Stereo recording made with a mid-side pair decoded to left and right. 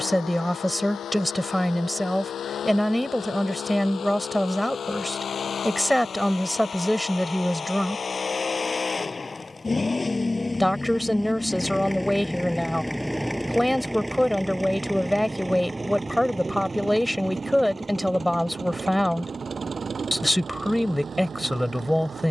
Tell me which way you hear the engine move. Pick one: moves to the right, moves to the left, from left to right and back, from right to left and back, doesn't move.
moves to the right.